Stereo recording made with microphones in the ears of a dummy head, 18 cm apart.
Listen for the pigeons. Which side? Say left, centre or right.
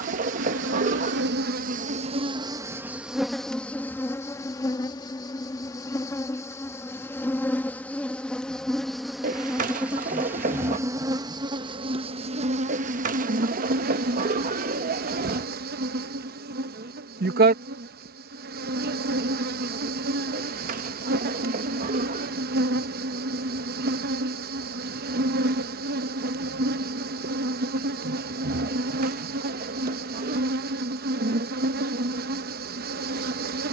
right.